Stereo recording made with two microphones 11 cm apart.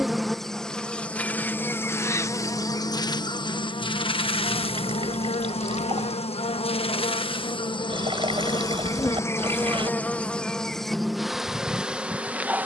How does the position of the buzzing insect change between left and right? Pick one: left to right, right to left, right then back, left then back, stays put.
left then back.